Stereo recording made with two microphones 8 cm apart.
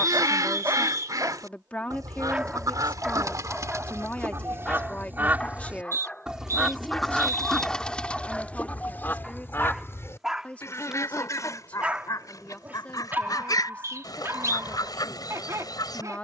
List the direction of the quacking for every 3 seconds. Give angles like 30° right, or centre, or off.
50° right, 30° right, 10° left, 30° left, 50° left, 50° left.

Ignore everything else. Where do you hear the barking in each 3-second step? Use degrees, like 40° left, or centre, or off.
30° right, 10° left, 10° left, centre, 20° right, 40° right.